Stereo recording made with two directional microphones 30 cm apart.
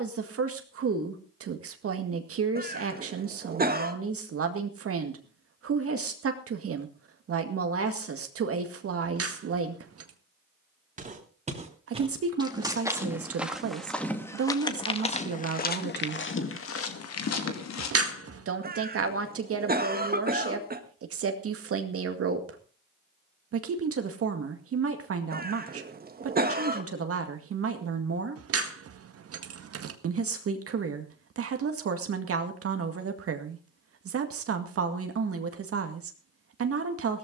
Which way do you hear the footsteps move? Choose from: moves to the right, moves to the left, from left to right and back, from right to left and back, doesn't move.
moves to the left.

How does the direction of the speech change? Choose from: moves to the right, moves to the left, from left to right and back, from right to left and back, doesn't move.
doesn't move.